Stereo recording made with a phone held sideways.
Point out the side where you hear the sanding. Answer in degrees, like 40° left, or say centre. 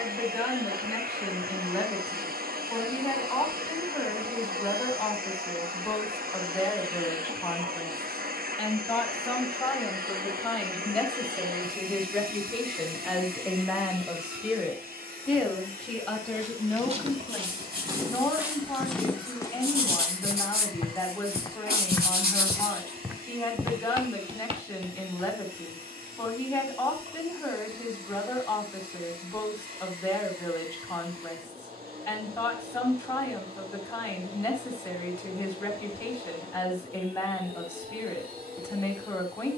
80° right.